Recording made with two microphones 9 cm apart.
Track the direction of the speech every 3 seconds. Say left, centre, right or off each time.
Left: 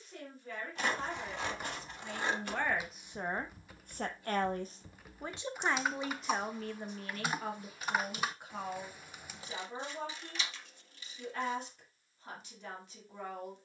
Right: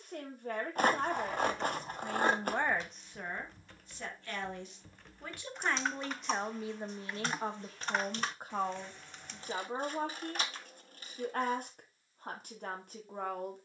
right, left, right, right, right.